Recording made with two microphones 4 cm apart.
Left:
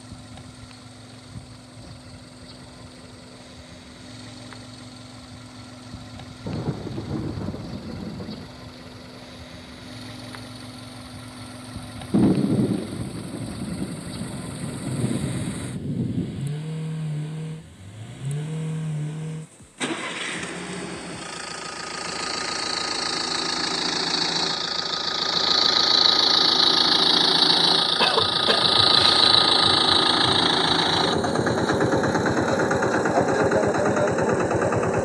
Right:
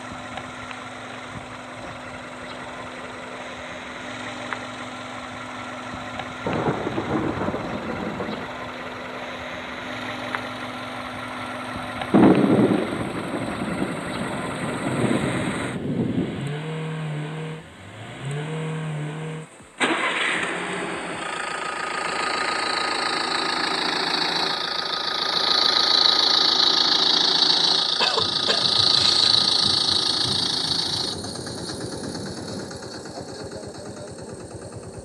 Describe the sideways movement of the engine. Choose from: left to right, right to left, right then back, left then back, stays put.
right to left.